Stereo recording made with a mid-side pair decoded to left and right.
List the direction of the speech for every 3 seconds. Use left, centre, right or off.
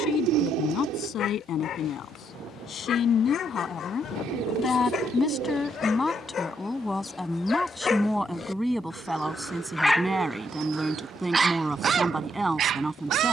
left, left, centre, centre, centre.